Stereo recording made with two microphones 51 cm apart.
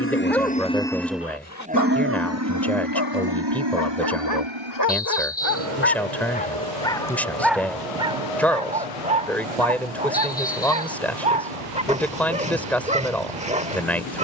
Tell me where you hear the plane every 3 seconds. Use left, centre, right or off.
centre, right, right, right, right.